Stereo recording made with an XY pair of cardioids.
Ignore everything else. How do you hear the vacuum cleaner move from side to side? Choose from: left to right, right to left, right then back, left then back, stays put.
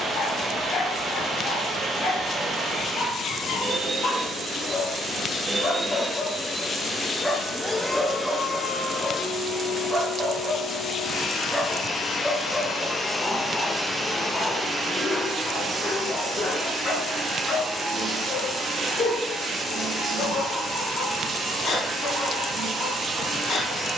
left then back.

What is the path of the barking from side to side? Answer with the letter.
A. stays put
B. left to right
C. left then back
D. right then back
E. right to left
D.